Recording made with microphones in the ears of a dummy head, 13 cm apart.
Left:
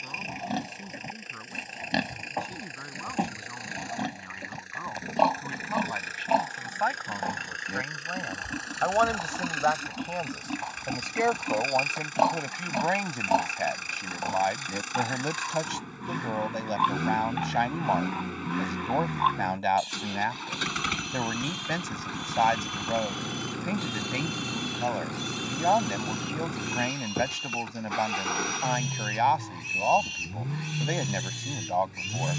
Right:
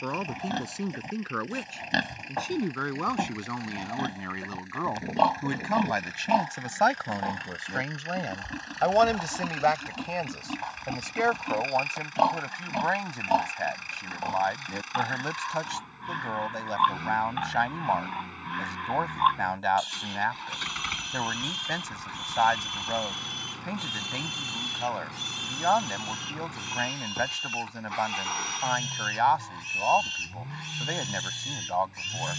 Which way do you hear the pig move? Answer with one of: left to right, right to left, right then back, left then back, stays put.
stays put.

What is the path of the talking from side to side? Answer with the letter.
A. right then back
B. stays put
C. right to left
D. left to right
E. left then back
C.